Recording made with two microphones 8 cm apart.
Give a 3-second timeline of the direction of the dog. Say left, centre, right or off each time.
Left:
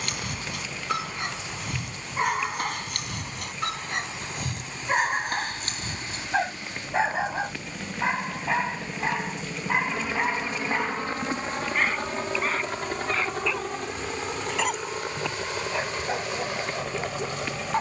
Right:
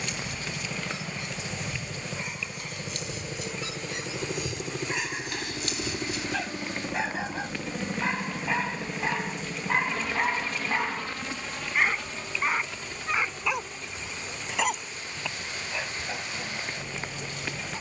left, left, left, centre, centre, left.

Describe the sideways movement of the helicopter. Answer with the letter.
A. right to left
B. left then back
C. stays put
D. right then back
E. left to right
A.